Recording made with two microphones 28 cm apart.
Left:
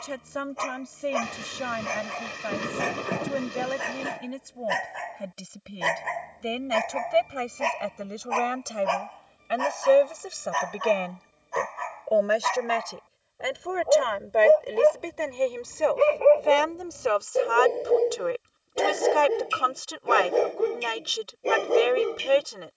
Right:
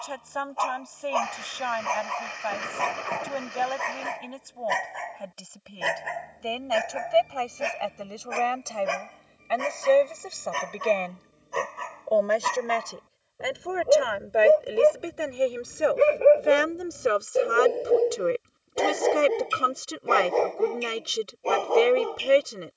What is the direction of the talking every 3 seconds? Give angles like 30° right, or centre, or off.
30° left, 20° left, 20° left, 10° left, centre, 20° right, 30° right, 30° right.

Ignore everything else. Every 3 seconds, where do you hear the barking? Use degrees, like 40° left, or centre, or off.
20° left, centre, 10° right, 30° right, 30° right, 10° right, 10° left, 20° left.